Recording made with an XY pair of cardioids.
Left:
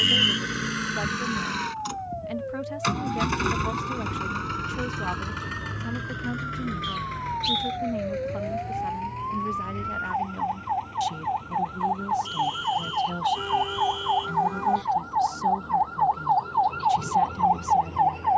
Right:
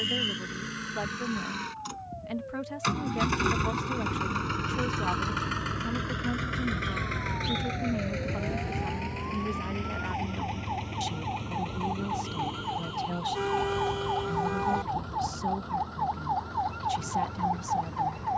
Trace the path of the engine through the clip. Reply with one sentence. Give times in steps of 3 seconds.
In this clip you hear the engine on the left from 0 s, in the centre from 3 s and on the right from 6 s.